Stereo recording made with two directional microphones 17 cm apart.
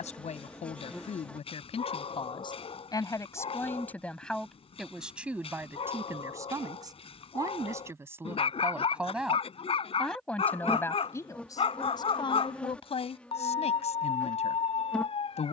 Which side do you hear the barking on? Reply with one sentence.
You can hear the barking on the left.